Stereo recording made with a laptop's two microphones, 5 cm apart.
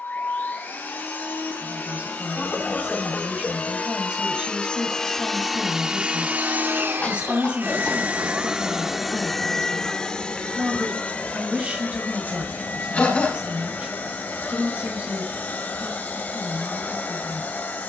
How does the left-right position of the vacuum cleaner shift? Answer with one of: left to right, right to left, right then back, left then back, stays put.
right then back.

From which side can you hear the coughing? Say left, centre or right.
left.